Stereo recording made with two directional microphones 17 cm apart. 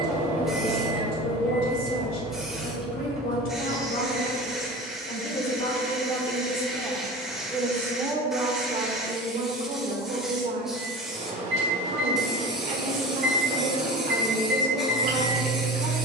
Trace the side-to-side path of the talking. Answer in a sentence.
You can hear the talking move from left to right.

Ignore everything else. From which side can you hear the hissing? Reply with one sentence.
You can hear the hissing in the centre.